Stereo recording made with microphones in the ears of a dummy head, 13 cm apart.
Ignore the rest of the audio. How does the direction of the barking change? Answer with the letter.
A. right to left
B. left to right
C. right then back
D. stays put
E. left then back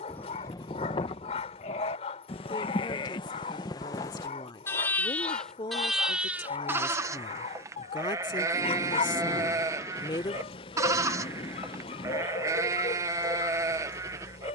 D.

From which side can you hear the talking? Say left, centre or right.
left.